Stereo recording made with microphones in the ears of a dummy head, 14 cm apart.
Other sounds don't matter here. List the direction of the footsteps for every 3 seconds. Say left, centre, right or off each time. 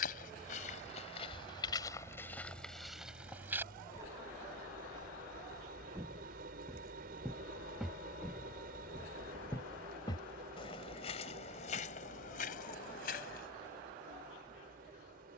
left, centre, centre, left, left.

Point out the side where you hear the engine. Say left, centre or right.
right.